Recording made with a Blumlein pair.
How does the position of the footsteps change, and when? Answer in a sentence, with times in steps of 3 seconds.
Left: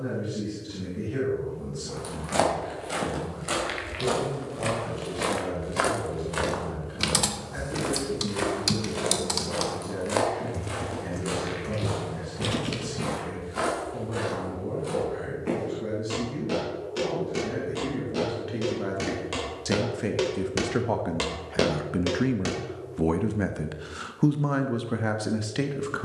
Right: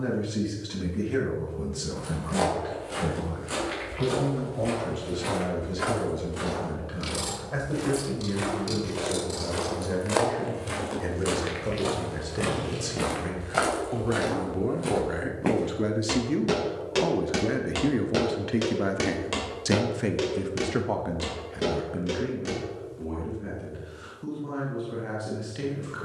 You can hear the footsteps on the left from 0 s, in the centre from 9 s, on the right from 12 s, in the centre from 18 s, on the left from 21 s and not at all from 24 s.